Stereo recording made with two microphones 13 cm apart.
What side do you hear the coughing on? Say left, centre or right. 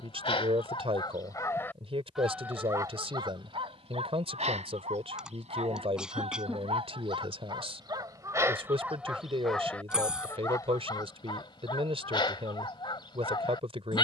centre.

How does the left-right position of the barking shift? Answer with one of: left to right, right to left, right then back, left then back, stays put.
right then back.